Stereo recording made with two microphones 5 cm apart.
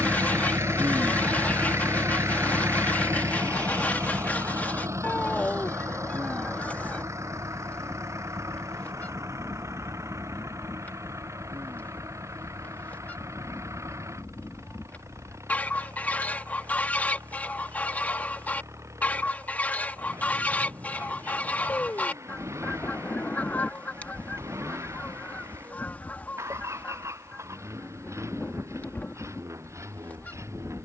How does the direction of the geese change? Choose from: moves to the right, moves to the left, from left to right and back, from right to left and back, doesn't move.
doesn't move.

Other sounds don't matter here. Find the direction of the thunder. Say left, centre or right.
left.